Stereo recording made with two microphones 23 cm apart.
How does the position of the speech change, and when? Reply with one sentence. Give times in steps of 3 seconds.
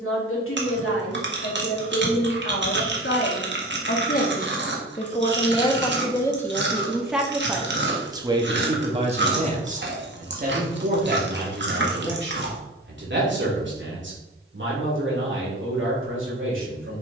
You can hear the speech on the left from 0 s, in the centre from 6 s and on the right from 9 s.